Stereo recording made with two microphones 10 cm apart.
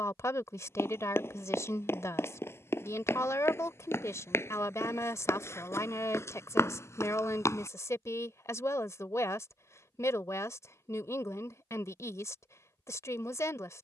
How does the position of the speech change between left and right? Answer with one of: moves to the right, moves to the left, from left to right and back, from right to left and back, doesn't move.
doesn't move.